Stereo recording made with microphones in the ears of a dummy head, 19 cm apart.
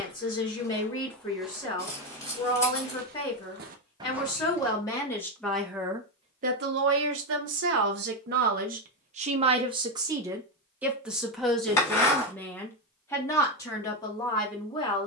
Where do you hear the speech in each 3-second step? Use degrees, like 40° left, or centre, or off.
20° left, 10° left, 50° right, 10° right, 20° left.